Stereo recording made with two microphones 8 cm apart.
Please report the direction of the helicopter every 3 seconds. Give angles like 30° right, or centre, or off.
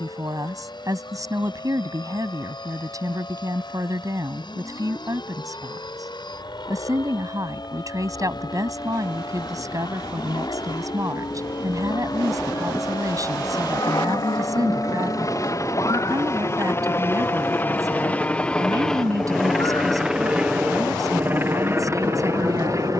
70° left, 70° left, 70° left, 60° left, 50° left, 30° left, centre, 30° right.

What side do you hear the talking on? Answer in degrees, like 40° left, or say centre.
50° right.